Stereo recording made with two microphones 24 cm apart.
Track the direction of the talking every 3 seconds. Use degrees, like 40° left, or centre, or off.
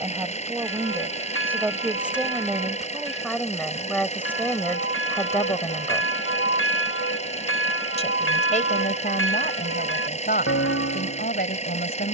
10° right, 10° left, 30° left, 40° left.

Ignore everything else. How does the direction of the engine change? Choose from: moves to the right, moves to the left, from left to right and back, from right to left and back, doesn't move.
doesn't move.